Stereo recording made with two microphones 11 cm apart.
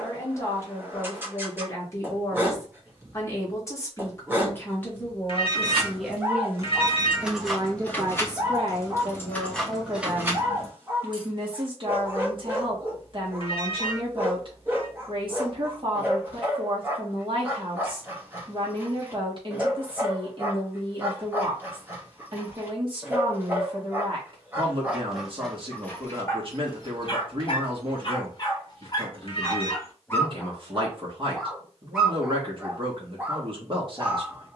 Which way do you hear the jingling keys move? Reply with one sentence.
You can hear the jingling keys move from right to left and back again.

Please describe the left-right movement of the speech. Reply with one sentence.
In this clip you hear the speech move from left to right.